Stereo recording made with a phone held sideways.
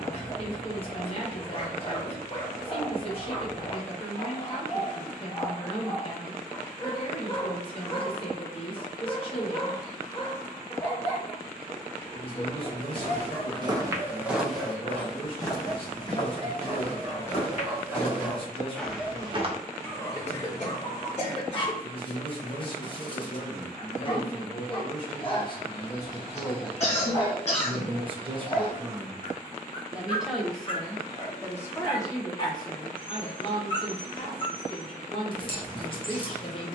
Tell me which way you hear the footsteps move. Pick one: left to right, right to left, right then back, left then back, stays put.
left then back.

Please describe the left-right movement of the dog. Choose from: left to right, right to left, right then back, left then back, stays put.
right then back.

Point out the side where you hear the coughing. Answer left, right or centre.
left.